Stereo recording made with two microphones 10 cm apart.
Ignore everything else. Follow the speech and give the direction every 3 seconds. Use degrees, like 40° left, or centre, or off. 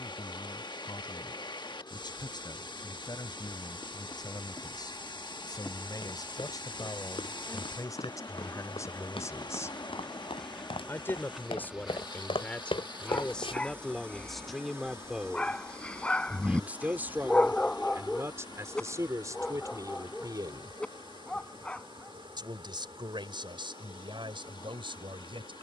50° left, 50° left, 40° left, 20° left, 10° left, 20° right, 40° right, 60° right, 60° right.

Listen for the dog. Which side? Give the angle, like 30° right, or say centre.
10° left.